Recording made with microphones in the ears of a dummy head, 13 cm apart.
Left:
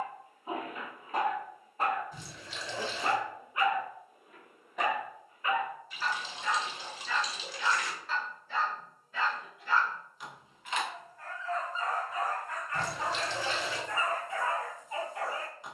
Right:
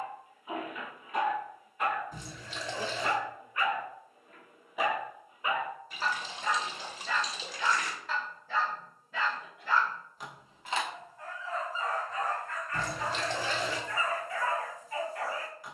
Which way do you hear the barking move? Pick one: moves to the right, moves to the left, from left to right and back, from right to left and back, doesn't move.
from left to right and back.